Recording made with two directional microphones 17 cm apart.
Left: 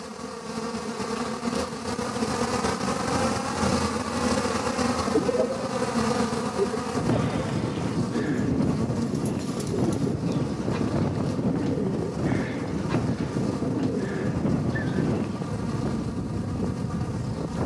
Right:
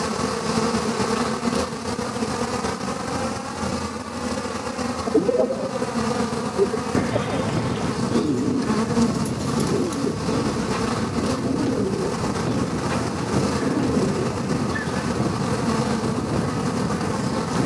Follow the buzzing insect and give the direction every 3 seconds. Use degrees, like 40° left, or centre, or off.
30° right, 10° left, 30° right, 60° right, 60° right, 60° right.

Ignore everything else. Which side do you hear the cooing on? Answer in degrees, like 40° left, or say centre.
30° right.